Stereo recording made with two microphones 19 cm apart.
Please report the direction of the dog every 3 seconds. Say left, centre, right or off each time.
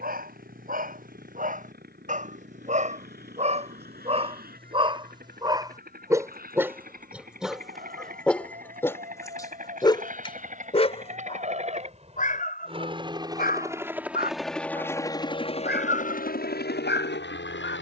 right, right, centre, left, left, left.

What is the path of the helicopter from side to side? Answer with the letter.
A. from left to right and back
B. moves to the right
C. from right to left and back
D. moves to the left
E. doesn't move
D.